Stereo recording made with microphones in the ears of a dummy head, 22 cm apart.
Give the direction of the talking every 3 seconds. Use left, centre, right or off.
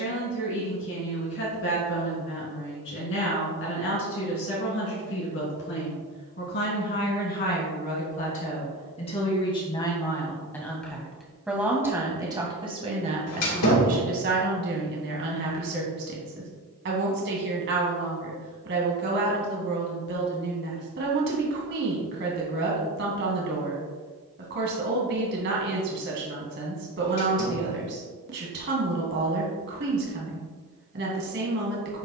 left, left, left, centre, right, right, right, right, right, right, right.